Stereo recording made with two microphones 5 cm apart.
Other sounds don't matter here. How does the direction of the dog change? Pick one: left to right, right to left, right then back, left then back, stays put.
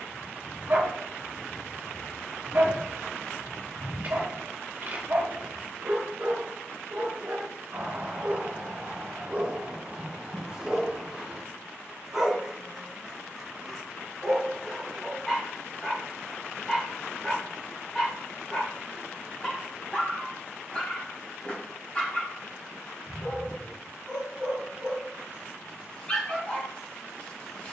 right to left.